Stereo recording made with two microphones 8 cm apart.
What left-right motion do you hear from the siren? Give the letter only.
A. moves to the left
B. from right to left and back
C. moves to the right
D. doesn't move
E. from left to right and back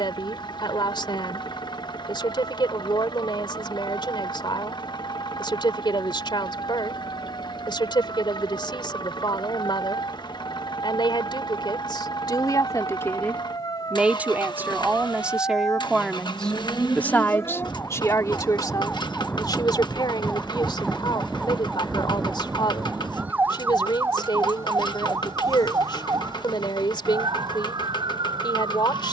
C.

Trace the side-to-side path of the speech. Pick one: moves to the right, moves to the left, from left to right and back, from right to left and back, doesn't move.
from left to right and back.